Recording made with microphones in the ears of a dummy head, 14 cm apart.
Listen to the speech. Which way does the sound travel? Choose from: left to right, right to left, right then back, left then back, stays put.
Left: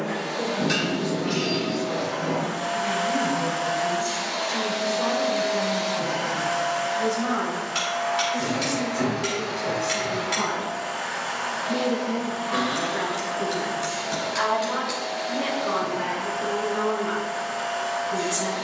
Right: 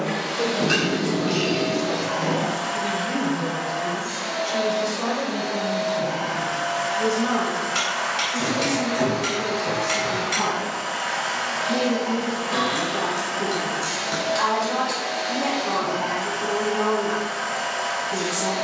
right to left.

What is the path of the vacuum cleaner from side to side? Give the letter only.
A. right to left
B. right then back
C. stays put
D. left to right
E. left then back
E.